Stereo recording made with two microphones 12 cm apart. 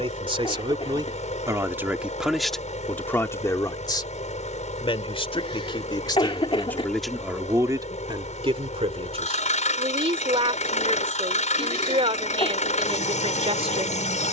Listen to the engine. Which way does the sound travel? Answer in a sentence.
In this clip you hear the engine stay put.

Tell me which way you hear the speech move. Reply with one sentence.
You can hear the speech move from right to left and back again.